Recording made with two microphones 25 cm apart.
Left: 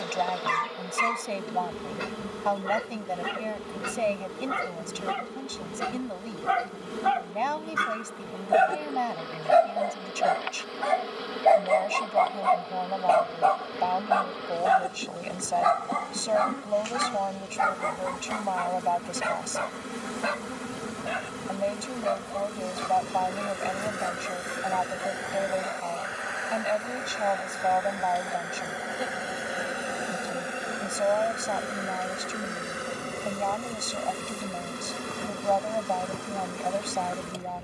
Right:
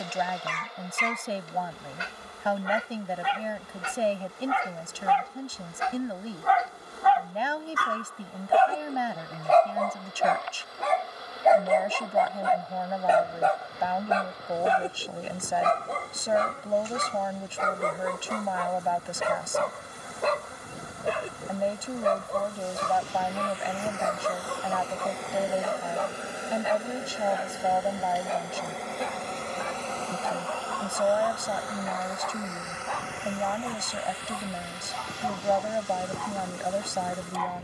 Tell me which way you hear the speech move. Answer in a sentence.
In this clip you hear the speech stay in one place.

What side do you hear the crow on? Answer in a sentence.
You can hear the crow on the left.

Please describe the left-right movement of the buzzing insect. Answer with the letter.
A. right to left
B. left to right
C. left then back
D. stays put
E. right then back
E.